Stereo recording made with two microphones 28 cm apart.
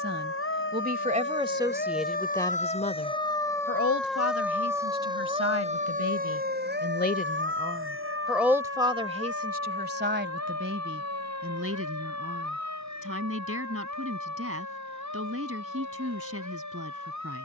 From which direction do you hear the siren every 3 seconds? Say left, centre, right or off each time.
left, centre, right, right, right, right.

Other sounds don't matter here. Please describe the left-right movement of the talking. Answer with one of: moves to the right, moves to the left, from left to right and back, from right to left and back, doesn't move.
from right to left and back.